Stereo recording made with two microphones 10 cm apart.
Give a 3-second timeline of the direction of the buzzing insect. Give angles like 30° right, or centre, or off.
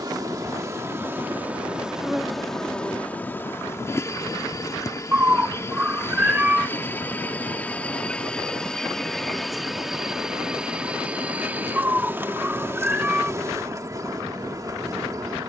10° right, 30° left, 20° left, 10° right, 30° right.